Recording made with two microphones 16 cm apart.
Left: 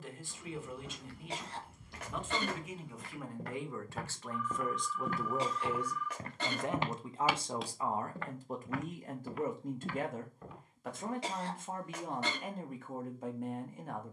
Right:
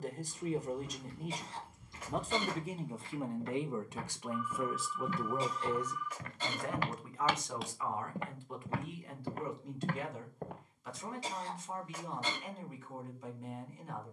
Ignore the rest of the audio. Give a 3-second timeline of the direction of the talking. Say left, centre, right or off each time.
right, centre, left, left, left.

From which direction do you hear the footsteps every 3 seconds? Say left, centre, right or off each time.
left, left, centre, right, off.